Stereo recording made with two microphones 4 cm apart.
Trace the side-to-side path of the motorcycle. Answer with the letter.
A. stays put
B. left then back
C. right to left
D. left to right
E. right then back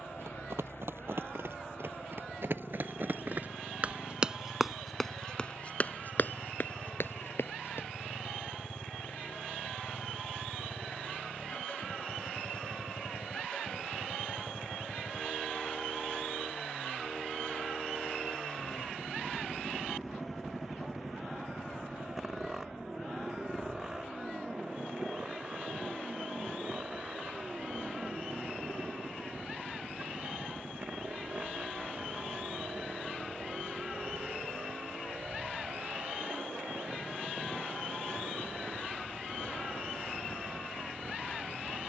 D.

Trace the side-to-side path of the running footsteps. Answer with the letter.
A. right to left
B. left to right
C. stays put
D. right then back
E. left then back
A.